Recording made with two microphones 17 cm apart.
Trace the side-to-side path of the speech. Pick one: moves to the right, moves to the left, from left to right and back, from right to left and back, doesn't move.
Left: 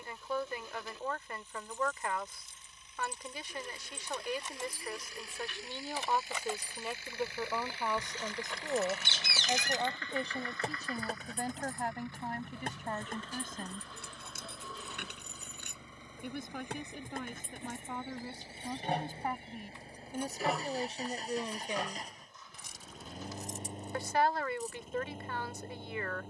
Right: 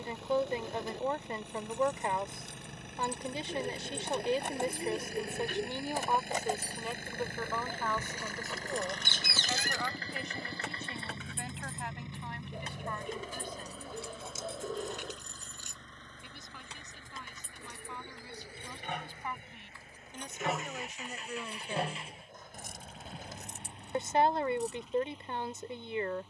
from right to left and back.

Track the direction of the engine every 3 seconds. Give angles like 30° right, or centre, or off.
70° right, 60° right, 50° right, 30° right, 10° right, 10° left, 30° left, 40° left, 50° left.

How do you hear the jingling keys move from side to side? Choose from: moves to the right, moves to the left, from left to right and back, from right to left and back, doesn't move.
from right to left and back.